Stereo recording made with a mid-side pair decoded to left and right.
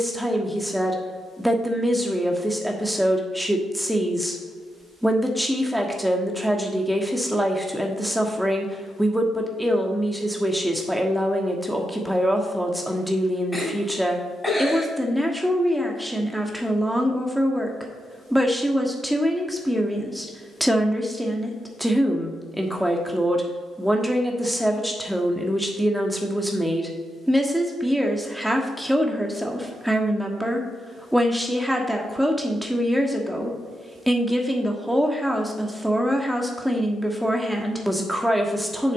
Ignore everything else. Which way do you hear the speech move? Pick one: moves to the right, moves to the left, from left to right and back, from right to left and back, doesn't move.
doesn't move.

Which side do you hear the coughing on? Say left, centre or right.
centre.